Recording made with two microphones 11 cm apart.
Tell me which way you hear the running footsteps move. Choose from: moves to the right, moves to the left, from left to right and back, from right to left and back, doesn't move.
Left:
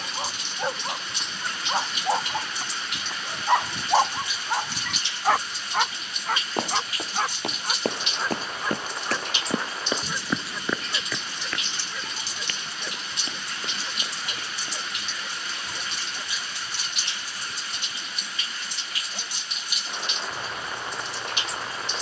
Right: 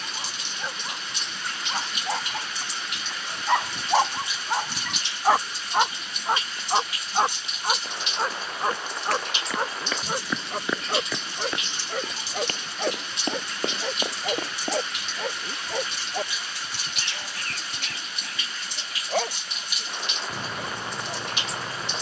moves to the right.